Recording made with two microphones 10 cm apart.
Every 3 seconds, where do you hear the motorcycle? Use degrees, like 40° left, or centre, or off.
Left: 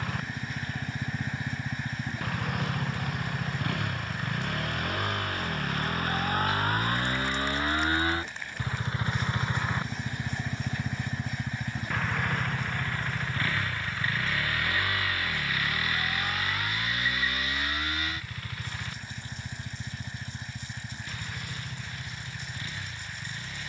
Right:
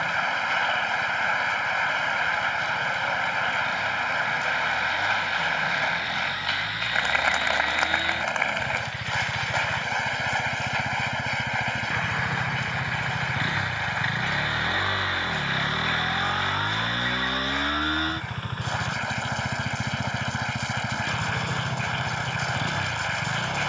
70° left, 60° left, 40° left, 10° left, 20° right, 30° right, 50° right, 50° right.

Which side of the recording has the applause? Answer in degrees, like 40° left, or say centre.
80° right.